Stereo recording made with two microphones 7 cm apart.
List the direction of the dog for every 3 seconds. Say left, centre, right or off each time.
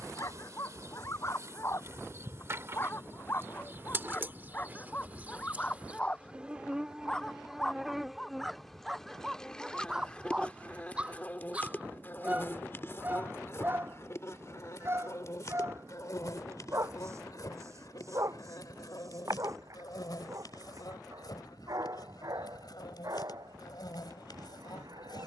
left, left, centre, centre, right, right, right, right, right.